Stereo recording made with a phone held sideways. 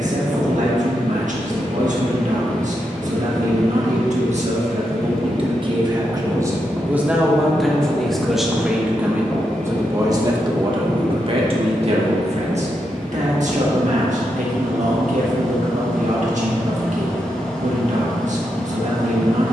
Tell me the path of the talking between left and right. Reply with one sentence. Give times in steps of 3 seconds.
In this clip you hear the talking on the right from 0 s, in the centre from 6 s and on the right from 9 s.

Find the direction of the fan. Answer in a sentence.
You can hear the fan in the centre.